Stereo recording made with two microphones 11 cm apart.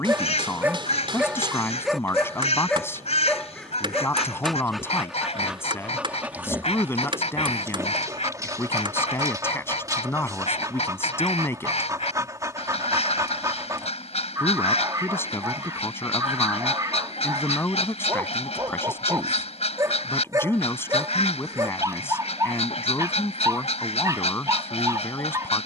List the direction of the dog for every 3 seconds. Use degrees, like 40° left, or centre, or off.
centre, centre, 20° right, 30° right, 30° right, 30° right, 30° right, 30° right, 30° right.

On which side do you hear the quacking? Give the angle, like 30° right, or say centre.
80° left.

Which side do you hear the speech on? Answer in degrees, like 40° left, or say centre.
20° left.